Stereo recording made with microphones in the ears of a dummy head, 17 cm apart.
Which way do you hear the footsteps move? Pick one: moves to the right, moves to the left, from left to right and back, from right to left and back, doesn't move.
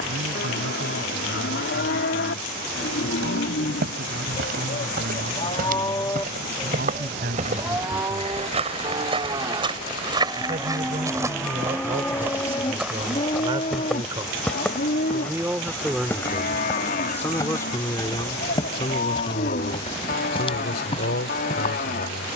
moves to the left.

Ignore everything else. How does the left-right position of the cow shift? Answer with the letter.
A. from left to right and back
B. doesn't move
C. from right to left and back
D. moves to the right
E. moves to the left
A.